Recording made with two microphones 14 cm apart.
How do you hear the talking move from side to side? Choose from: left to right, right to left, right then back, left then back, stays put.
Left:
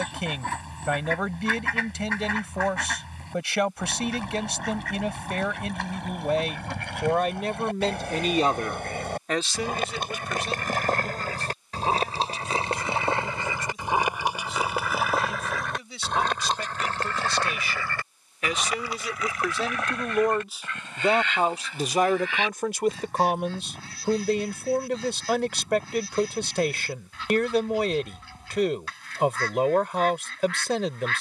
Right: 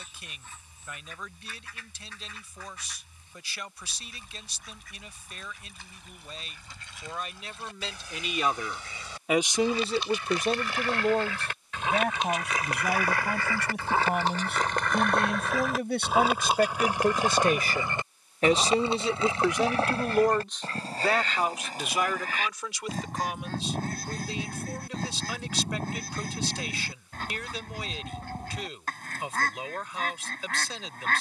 right then back.